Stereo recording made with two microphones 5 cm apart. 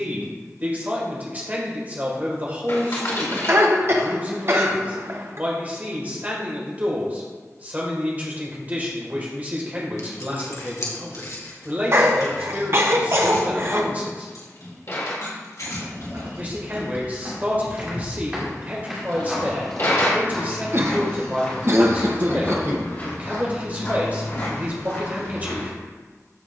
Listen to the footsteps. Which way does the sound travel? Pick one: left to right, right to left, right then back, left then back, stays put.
right to left.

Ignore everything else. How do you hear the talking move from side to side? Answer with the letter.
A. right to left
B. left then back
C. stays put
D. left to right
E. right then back
C.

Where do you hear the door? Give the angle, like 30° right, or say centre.
50° left.